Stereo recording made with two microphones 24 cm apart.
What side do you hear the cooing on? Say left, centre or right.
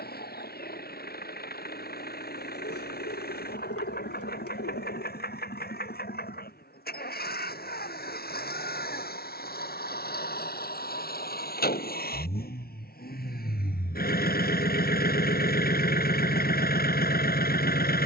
left.